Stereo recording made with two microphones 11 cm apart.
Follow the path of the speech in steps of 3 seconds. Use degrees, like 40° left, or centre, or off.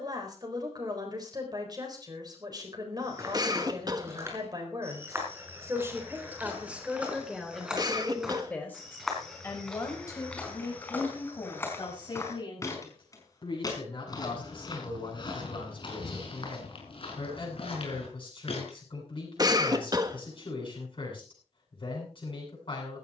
40° right, 30° right, centre, 30° left, 50° left, 50° left, 50° left, 50° left.